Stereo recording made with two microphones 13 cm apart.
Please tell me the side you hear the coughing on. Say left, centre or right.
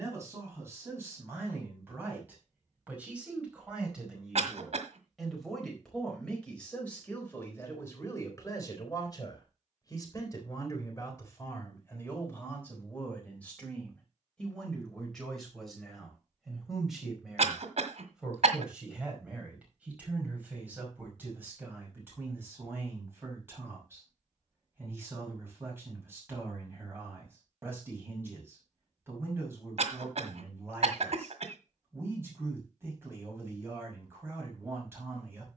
right.